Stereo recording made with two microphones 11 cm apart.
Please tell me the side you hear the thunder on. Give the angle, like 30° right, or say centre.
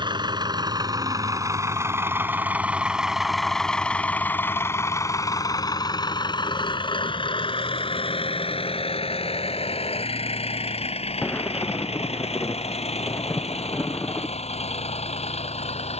20° left.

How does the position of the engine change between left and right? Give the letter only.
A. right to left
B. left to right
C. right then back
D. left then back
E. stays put
A.